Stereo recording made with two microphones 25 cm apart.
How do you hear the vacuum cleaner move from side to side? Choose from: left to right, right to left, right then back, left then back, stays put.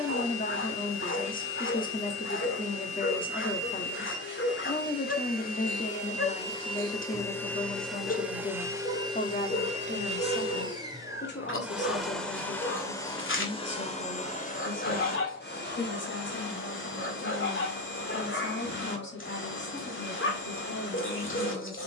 right then back.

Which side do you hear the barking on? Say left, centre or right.
left.